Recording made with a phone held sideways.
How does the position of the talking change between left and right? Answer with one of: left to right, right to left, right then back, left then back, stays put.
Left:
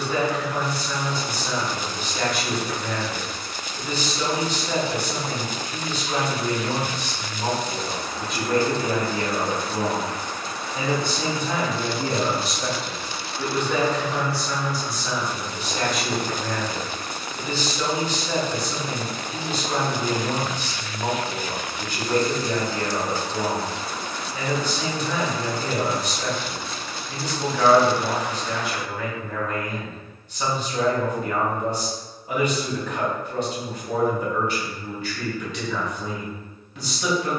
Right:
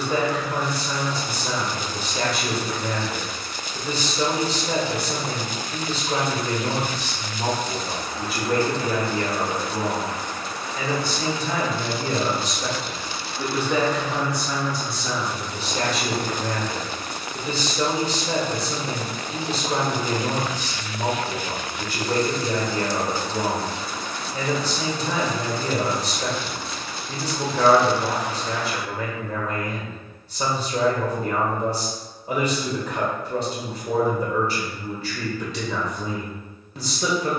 left then back.